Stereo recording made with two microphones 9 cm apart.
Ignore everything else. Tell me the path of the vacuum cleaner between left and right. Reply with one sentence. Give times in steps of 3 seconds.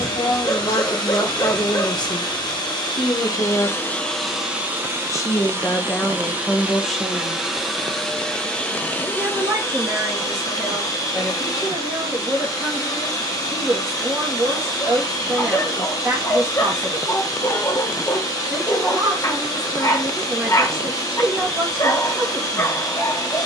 You can hear the vacuum cleaner on the left from 0 s, in the centre from 3 s and on the left from 9 s.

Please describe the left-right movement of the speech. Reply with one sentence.
You can hear the speech go from the left side to the right.